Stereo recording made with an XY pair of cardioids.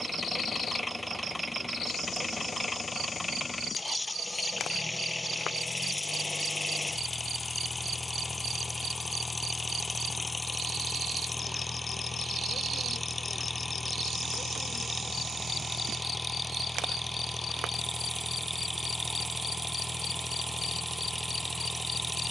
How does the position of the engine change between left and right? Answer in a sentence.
In this clip you hear the engine stay in one place.